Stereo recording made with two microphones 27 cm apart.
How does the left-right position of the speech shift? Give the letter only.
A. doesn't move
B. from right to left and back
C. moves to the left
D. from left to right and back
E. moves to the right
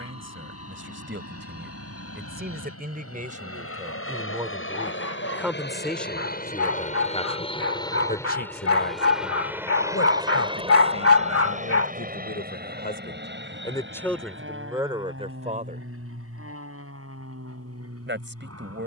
B.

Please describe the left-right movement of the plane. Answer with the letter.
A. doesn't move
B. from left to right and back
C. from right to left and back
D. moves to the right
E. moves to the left
D.